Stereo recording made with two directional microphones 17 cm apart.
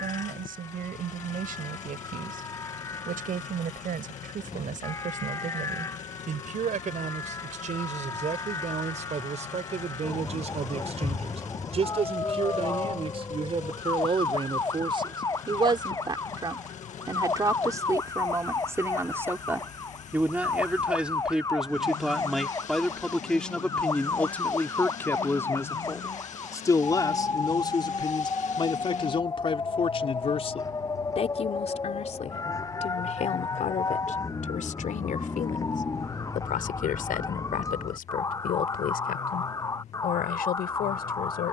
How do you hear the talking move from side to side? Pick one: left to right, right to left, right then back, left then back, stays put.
right to left.